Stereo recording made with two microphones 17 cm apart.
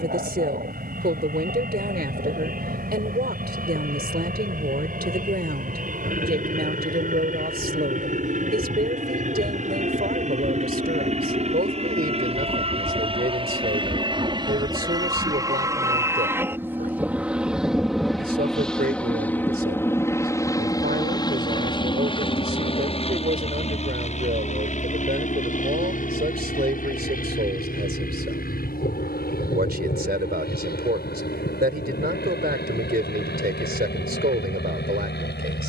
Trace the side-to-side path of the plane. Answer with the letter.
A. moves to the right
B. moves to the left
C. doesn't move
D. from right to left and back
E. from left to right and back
B.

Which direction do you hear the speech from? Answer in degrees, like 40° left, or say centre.
70° right.